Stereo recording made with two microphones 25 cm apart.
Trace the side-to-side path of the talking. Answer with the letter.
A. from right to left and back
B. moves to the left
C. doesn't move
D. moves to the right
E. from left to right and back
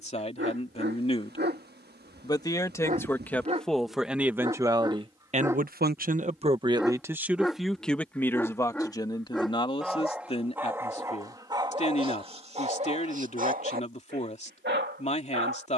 E.